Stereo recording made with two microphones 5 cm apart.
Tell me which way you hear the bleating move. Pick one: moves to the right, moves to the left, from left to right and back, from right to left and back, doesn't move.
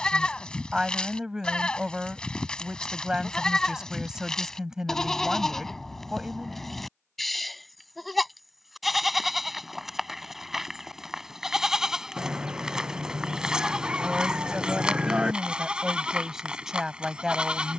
moves to the right.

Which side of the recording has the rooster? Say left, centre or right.
right.